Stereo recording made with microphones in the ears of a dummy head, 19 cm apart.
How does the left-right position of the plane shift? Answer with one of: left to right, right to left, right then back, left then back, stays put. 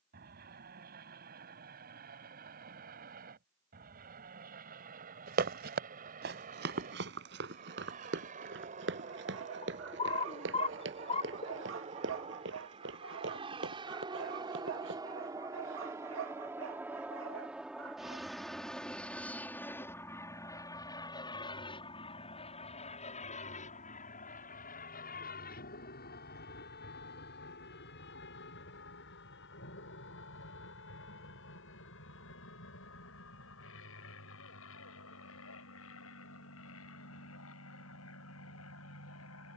right to left.